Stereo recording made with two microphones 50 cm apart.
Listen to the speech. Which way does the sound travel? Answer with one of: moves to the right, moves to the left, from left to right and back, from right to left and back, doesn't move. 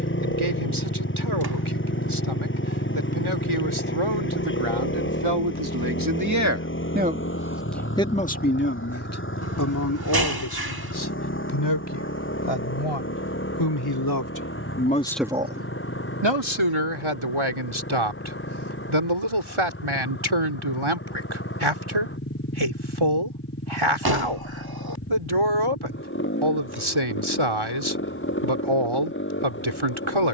from right to left and back.